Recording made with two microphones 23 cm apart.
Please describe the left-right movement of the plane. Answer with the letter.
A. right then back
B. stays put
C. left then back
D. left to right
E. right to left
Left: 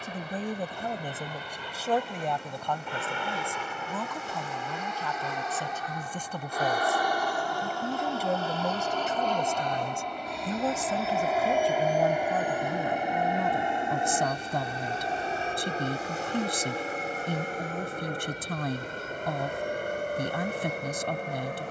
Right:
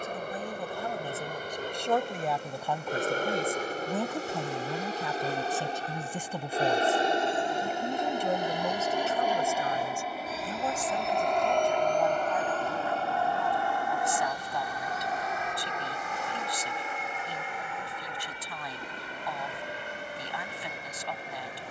E.